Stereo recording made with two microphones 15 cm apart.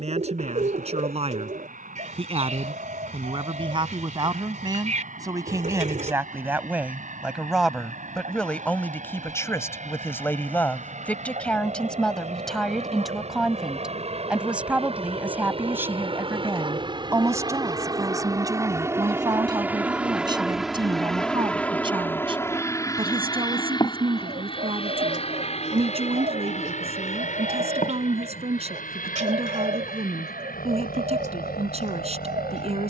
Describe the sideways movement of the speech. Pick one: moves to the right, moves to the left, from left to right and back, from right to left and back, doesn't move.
from right to left and back.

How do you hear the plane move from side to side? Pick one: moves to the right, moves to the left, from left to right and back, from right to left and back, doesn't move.
moves to the left.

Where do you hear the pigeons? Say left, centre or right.
right.